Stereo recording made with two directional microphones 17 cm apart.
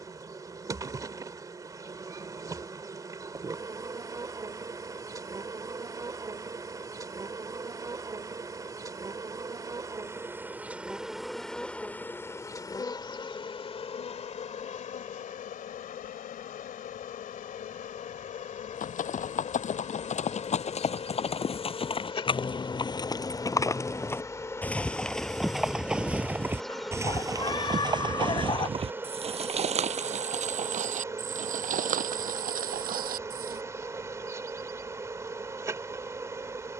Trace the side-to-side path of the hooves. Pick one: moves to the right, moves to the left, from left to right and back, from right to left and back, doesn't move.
moves to the right.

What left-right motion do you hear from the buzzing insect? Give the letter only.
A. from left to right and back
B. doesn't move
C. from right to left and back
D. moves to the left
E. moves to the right
C.